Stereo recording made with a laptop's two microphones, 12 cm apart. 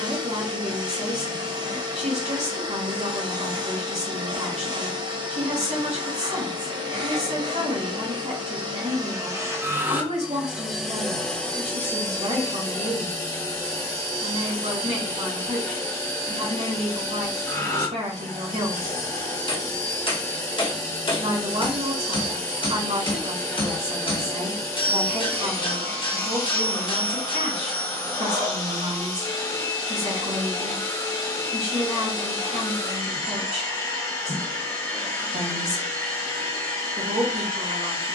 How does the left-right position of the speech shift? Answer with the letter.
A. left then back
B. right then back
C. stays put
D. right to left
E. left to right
C.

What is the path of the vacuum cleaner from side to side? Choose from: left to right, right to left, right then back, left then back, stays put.
right to left.